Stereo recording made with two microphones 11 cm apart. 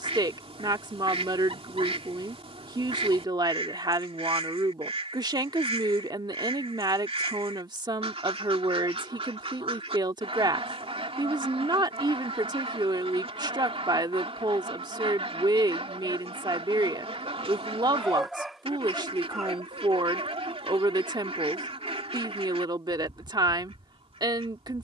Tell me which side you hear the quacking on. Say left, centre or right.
right.